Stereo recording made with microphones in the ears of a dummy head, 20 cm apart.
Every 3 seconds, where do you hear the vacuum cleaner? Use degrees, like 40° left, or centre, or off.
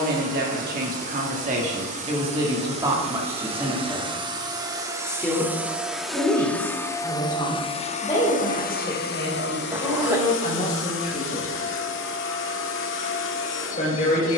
40° right, 20° right, 20° left, 60° left, 60° left.